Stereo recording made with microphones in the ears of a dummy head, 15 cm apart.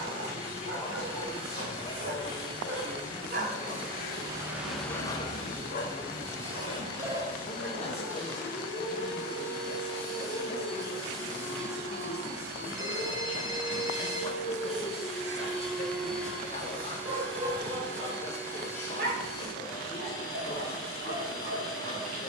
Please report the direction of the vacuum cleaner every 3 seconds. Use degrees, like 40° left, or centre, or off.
30° right, 30° right, 30° right, 20° right, 10° right, 10° left, 20° left, 30° left.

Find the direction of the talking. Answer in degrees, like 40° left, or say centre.
40° left.